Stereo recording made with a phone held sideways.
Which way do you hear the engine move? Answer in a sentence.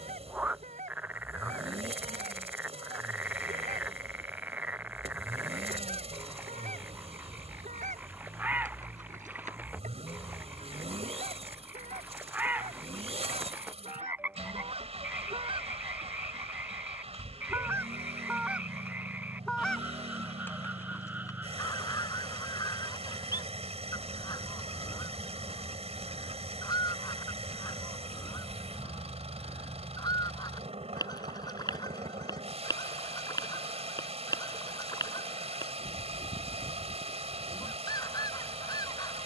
You can hear the engine stay put.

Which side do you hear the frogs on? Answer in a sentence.
You can hear the frogs in the centre.